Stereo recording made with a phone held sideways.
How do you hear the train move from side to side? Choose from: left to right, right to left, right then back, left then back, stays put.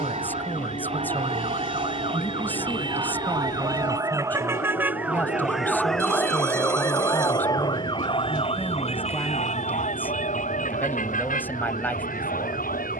stays put.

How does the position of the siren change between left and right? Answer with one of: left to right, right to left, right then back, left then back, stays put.
right to left.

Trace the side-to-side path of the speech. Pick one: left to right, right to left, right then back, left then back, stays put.
stays put.